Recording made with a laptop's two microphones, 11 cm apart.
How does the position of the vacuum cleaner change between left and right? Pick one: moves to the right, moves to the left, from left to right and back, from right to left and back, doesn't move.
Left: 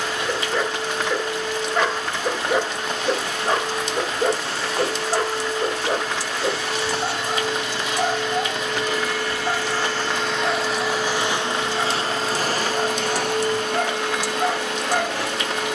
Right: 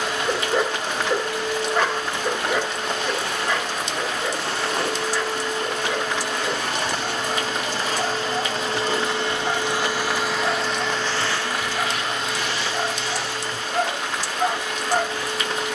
moves to the left.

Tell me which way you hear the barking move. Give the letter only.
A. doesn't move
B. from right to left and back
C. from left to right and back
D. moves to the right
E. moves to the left
B.